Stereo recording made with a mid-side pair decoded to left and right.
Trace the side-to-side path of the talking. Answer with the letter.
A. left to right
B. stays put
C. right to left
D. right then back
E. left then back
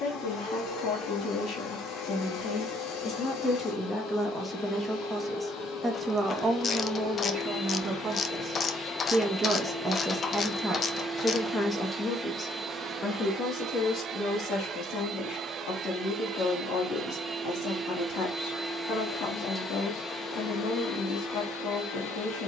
D.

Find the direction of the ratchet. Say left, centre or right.
left.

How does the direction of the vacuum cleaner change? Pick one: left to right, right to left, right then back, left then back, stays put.
right then back.